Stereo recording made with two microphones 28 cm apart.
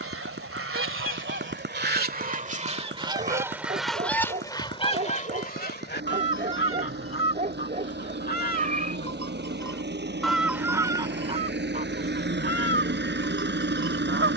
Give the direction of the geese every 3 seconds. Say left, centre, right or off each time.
right, centre, left, centre, right.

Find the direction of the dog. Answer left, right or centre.
right.